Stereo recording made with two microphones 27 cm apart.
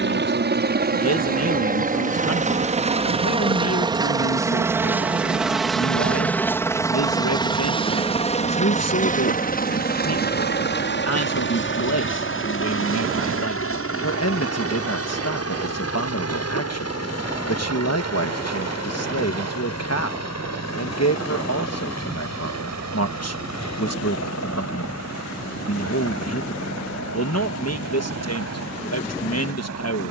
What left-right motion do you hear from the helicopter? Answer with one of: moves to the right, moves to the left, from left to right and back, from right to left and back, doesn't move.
moves to the left.